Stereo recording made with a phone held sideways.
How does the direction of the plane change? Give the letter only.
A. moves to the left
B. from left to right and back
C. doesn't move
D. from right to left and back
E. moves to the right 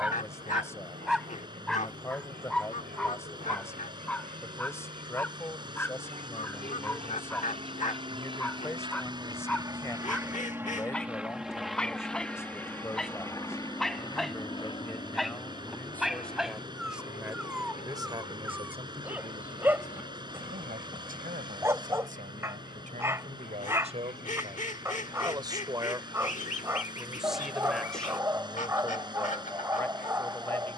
A.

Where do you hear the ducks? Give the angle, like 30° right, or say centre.
50° left.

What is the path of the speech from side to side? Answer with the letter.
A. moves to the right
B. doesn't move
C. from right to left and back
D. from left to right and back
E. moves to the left
D.